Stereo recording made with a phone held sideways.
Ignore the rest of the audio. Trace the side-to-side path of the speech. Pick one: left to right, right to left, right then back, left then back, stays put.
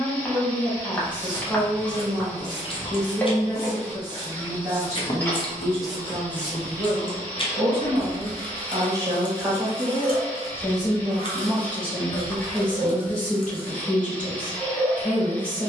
right then back.